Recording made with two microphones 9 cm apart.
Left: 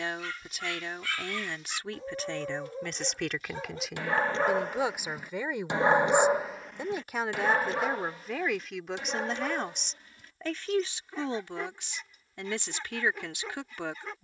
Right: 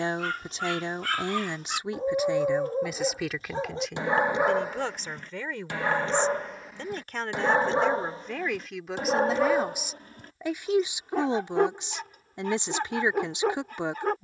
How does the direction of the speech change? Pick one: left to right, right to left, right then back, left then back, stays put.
left then back.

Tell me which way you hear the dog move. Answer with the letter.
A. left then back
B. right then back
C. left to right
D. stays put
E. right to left
A.